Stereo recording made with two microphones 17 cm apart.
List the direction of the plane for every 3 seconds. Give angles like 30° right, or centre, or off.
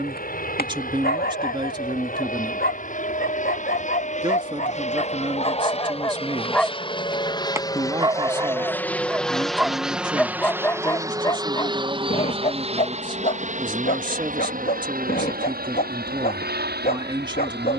60° left, 50° left, 20° left, 10° right, 40° right, 60° right.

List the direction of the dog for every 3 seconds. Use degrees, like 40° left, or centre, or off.
60° left, 50° left, 10° right, 10° left, 50° left, 60° left.